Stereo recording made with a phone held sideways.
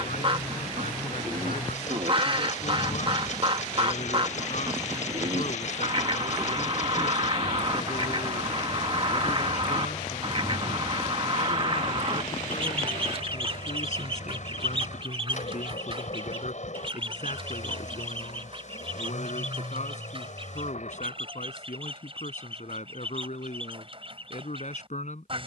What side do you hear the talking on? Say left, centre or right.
left.